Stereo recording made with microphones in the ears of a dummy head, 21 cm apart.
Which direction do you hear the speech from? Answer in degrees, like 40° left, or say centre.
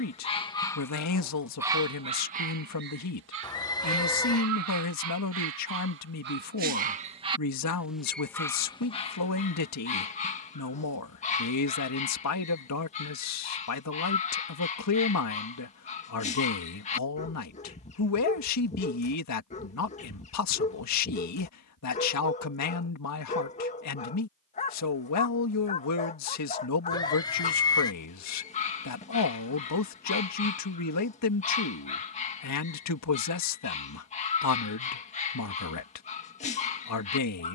80° left.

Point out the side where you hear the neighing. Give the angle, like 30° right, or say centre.
20° left.